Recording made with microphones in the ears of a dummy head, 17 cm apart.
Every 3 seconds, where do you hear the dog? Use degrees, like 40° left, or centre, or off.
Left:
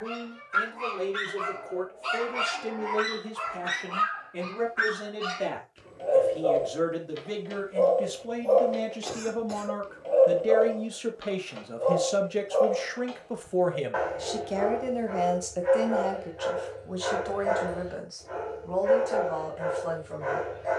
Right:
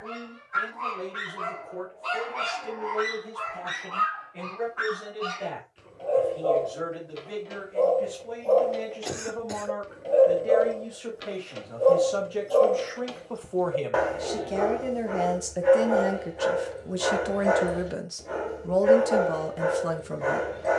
30° left, 20° left, 10° left, 20° right, 50° right, 60° right, 60° right.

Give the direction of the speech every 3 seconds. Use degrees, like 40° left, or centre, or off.
60° left, 60° left, 50° left, 40° left, 20° left, 20° right, 50° right.